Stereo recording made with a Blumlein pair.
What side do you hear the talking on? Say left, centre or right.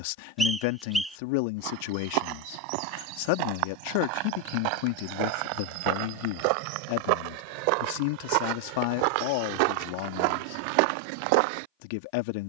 left.